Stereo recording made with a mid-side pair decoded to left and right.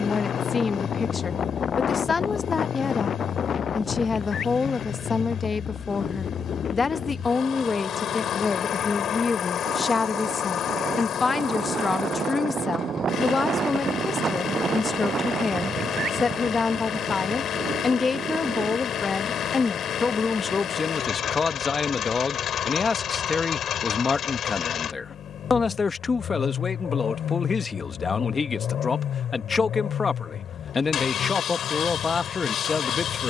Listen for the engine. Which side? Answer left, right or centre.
left.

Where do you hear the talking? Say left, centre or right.
left.